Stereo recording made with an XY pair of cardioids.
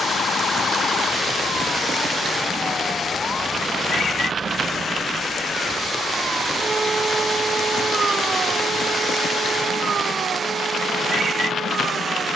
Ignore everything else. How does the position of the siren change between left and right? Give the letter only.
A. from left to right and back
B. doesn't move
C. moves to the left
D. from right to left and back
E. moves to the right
E.